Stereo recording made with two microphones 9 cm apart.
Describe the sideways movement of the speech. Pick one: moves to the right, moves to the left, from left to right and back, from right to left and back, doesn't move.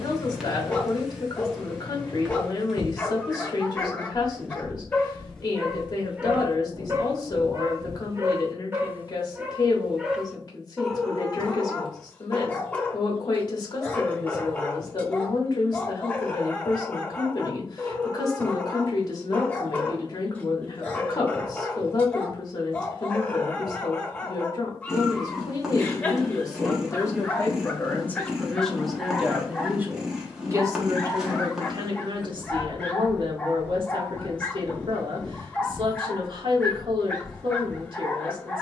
moves to the right.